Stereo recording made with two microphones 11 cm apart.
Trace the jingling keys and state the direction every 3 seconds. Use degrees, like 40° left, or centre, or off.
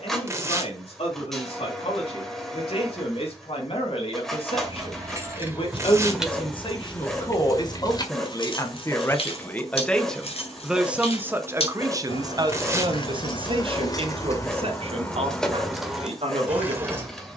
off, 20° right, 30° left, 70° left, 40° left, centre.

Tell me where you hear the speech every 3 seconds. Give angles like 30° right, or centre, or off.
70° left, 60° left, 40° left, centre, 50° right, 70° right.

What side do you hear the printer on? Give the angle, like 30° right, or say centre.
centre.